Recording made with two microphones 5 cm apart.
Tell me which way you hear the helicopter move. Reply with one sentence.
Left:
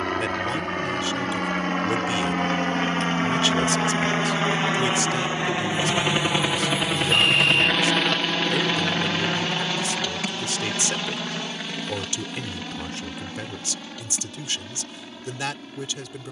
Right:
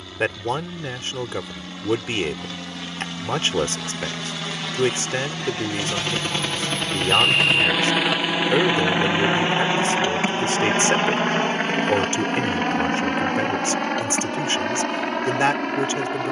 You can hear the helicopter go from the left side to the right.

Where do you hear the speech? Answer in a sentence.
You can hear the speech on the right.